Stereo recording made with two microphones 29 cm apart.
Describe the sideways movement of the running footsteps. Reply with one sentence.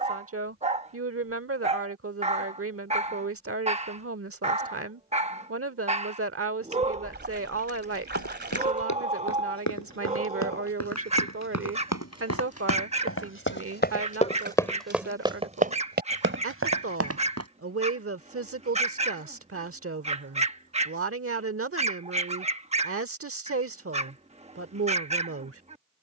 In this clip you hear the running footsteps go from the left side to the right.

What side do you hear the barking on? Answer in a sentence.
In this clip you hear the barking on the right.